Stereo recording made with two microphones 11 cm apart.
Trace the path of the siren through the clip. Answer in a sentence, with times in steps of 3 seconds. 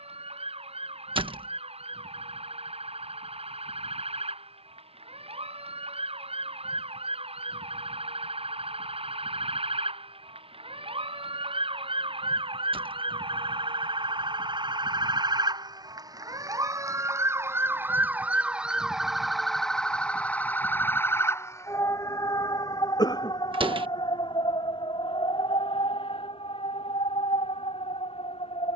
You can hear the siren on the right from 0 s, in the centre from 18 s and on the left from 21 s.